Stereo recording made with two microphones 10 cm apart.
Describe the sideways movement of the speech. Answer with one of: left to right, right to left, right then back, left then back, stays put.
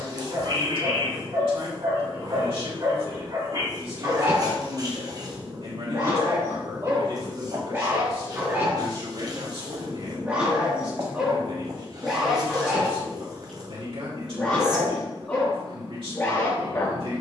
stays put.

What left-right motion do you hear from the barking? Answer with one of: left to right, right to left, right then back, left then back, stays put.
right to left.